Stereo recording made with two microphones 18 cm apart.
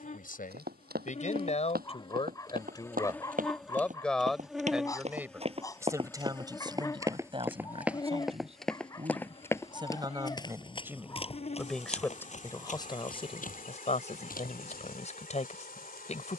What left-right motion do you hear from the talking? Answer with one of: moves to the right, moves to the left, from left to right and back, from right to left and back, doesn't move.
from left to right and back.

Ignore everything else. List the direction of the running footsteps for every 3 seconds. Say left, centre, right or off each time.
right, right, centre, left, left, off.